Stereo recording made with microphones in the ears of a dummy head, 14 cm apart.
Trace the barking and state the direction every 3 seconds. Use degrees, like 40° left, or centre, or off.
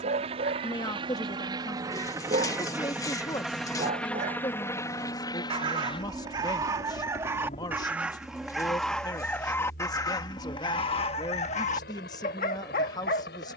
50° right, 40° right, 10° right, 30° left, 60° left.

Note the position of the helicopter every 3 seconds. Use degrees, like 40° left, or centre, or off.
30° right, 10° left, 40° left, 60° left, 70° left.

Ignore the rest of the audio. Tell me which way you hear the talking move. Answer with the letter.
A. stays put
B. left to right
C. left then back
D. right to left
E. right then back
A.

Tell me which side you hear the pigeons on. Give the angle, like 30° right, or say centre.
20° left.